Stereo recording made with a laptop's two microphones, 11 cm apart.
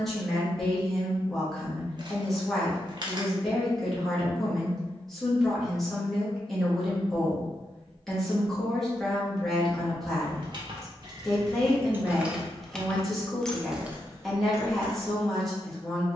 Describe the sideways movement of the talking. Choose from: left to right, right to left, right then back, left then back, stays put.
stays put.